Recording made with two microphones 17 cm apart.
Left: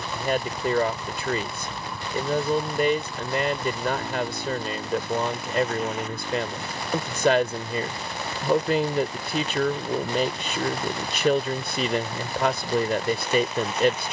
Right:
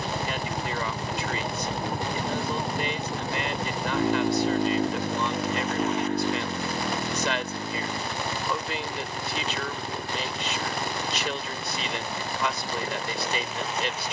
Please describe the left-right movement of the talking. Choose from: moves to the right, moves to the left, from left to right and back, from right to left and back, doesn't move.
doesn't move.